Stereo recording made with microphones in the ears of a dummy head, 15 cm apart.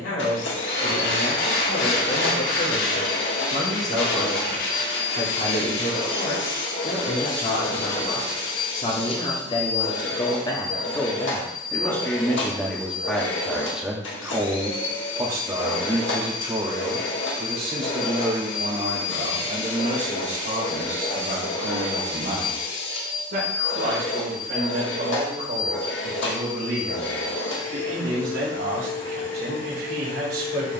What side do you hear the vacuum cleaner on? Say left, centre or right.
left.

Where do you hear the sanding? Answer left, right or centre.
left.